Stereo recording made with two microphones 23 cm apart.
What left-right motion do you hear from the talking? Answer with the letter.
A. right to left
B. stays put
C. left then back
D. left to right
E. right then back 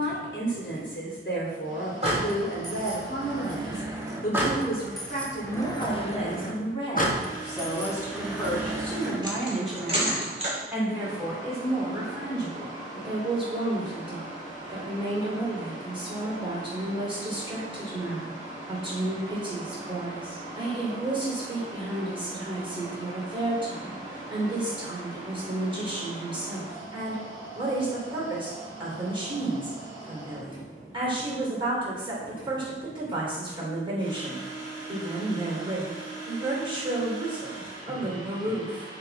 D.